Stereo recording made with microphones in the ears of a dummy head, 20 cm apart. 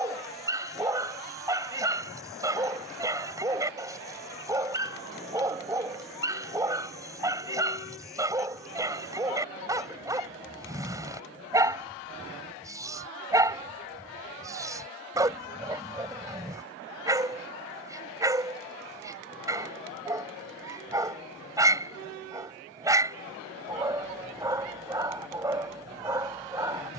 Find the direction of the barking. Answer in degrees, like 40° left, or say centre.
20° right.